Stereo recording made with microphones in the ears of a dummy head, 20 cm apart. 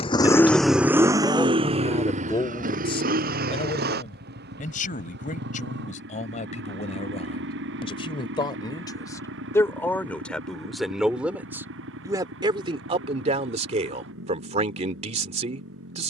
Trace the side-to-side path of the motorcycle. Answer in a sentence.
You can hear the motorcycle go from the left side to the right.